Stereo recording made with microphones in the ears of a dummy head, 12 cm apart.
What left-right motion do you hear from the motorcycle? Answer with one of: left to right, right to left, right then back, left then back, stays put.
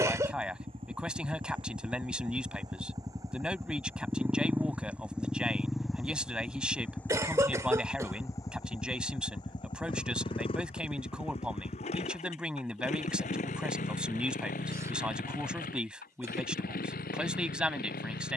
right to left.